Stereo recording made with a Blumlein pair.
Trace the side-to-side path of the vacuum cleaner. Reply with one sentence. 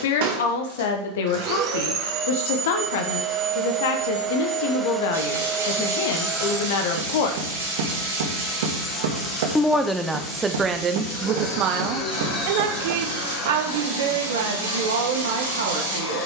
In this clip you hear the vacuum cleaner move to the left.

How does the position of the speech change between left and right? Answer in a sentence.
In this clip you hear the speech go from the left side to the right.